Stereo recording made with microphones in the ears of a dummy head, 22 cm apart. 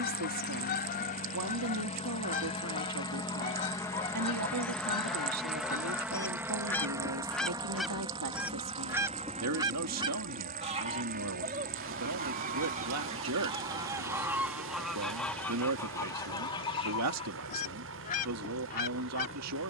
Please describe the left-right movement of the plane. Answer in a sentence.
In this clip you hear the plane travel towards the right.